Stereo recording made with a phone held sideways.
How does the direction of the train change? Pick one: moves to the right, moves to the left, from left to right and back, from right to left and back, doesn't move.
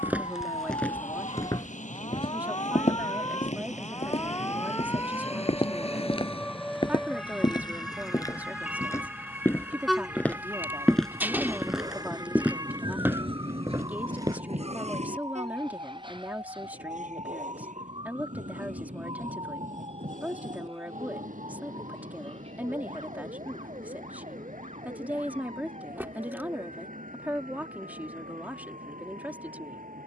moves to the right.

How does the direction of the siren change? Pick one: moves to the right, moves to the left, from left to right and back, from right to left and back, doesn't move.
moves to the right.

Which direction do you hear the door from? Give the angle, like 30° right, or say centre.
10° right.